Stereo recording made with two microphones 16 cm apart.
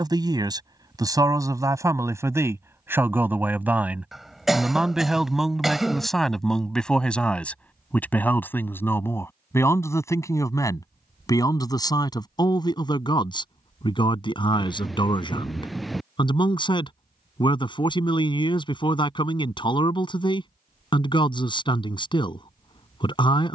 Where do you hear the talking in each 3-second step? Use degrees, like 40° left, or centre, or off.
20° right, 10° right, 10° left, 20° left, 30° left, 30° left, 30° left, 30° left.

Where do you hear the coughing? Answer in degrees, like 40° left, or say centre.
centre.